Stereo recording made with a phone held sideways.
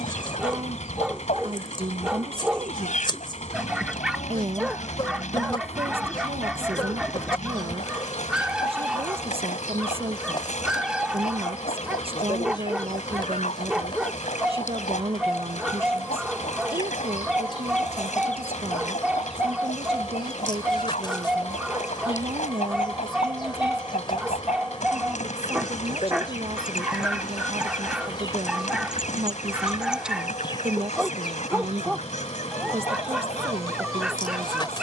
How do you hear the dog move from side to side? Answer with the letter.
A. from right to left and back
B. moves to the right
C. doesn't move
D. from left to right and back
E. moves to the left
C.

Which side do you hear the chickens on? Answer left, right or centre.
left.